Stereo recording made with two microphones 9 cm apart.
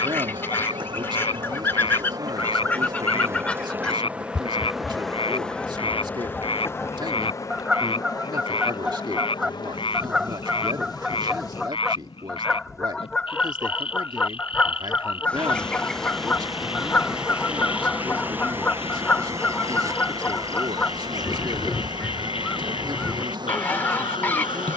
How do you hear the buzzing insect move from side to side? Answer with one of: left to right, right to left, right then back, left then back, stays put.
left then back.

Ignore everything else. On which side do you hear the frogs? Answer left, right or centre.
left.